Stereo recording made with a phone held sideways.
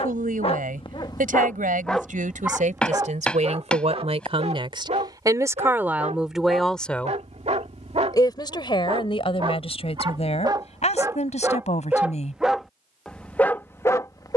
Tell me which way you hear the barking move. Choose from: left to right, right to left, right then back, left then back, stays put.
right then back.